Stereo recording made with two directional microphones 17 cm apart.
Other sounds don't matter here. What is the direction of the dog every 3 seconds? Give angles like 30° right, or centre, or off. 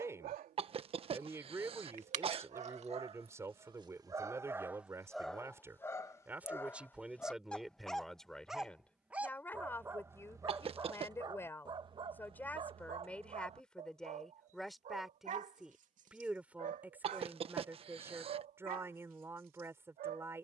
50° right, 10° right, 10° left, 20° right, 40° right, 50° right, 60° right.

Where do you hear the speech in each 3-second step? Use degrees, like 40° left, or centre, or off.
20° right, 20° right, centre, 10° left, 10° left, 10° right, 10° right.